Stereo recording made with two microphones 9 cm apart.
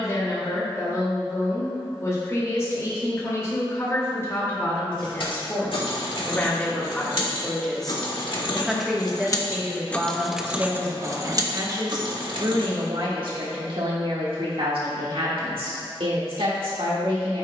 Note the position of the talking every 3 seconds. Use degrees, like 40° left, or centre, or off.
30° left, 30° left, 10° left, 30° right, 70° right, 80° right.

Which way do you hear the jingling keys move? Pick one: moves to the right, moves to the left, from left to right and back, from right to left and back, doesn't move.
moves to the right.